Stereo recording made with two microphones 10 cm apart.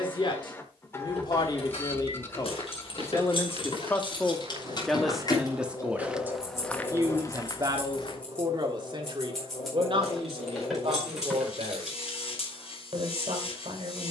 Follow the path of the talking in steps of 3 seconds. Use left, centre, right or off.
left, centre, right, right, right.